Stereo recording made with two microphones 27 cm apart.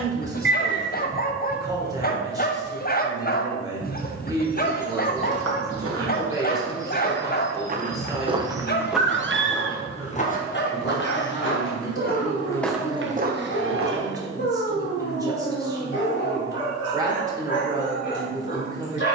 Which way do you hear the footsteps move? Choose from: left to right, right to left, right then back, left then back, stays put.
left then back.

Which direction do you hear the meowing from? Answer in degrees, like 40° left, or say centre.
40° right.